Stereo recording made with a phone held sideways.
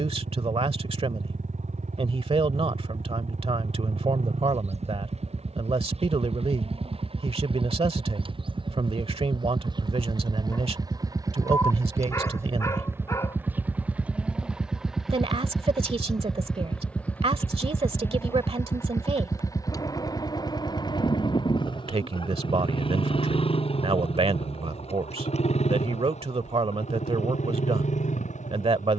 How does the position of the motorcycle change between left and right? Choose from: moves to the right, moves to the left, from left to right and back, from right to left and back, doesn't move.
moves to the left.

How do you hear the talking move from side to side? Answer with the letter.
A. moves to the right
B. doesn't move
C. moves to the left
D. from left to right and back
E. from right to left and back
B.